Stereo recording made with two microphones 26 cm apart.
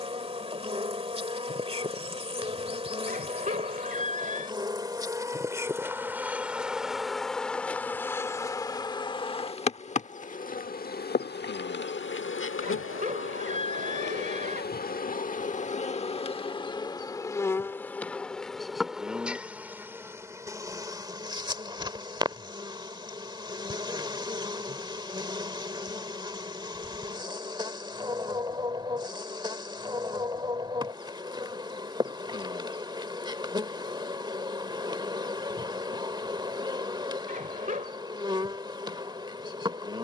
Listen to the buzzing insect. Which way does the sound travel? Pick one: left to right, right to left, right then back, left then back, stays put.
left then back.